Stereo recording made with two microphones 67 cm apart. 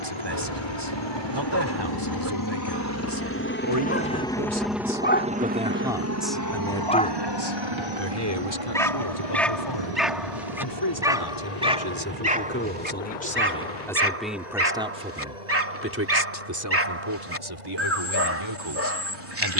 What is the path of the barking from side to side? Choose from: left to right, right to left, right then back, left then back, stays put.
left to right.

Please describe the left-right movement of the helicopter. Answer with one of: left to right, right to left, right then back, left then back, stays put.
left to right.